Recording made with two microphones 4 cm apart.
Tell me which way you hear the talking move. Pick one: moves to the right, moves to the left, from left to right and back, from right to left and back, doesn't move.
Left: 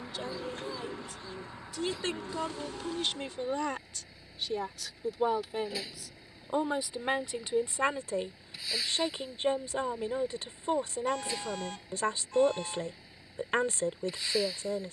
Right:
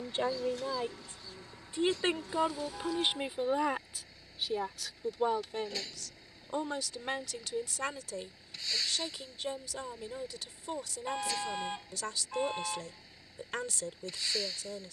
moves to the left.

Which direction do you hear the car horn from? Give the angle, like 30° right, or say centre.
20° right.